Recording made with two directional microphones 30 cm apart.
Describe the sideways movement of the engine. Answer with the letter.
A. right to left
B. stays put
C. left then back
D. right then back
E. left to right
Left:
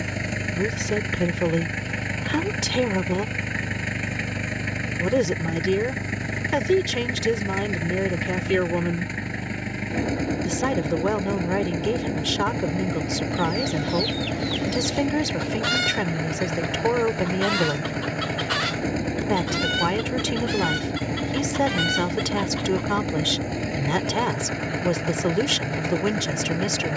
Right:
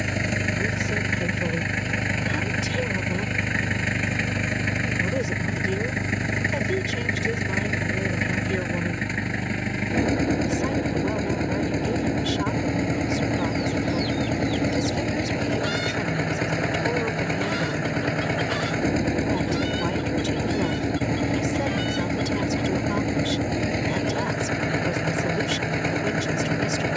B.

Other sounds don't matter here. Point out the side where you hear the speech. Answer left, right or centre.
left.